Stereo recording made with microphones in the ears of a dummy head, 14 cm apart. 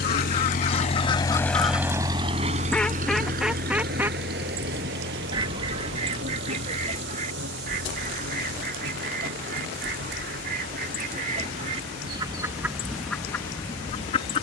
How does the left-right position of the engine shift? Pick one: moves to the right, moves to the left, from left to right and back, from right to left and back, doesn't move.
moves to the right.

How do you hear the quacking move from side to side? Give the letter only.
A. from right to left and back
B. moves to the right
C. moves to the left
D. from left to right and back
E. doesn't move
D.